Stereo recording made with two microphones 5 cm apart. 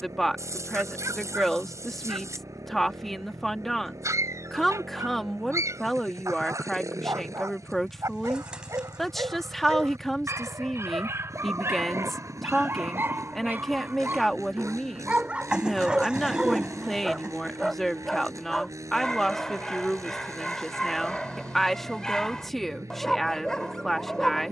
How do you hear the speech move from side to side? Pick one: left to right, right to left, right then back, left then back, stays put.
stays put.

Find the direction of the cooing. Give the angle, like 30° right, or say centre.
20° right.